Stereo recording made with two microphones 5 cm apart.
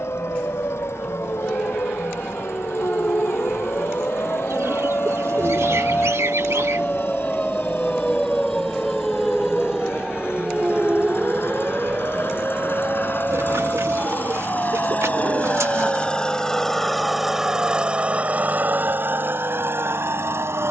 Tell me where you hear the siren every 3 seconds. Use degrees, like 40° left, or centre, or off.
70° left, 50° left, 20° left, 10° right, 30° right, 40° right, 50° right.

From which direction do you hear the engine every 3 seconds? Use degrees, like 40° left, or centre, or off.
70° left, 70° left, 60° left, 60° left, 50° left, 10° left, 50° right.